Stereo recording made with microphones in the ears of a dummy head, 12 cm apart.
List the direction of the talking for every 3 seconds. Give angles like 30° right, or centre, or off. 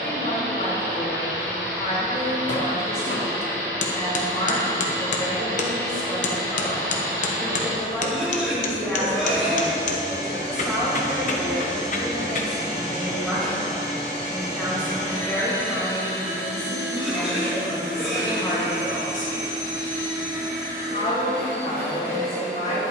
50° left, 40° left, 20° left, centre, centre, 20° left, 30° left, 50° left.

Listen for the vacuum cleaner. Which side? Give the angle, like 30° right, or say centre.
20° right.